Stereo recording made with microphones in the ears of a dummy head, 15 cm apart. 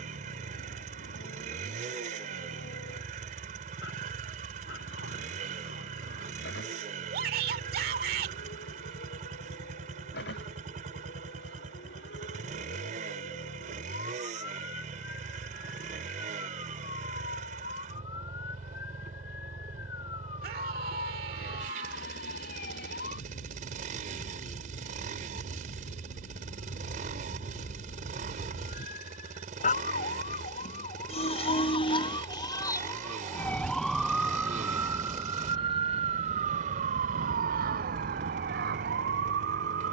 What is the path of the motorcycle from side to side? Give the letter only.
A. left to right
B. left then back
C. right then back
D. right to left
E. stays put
E.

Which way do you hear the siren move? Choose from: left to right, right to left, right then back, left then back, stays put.
left to right.